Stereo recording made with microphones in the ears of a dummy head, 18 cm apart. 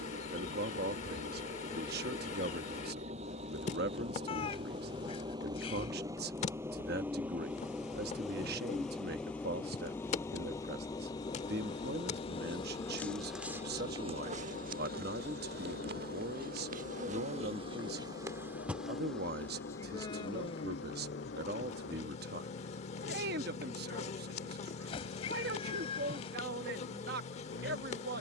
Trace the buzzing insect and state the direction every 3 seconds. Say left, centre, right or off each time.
left, left, left, left, centre, right, centre, left, left, left.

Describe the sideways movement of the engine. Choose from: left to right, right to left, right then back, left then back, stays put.
right to left.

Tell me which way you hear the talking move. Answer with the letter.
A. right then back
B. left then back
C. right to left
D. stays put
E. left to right
D.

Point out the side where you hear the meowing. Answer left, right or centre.
left.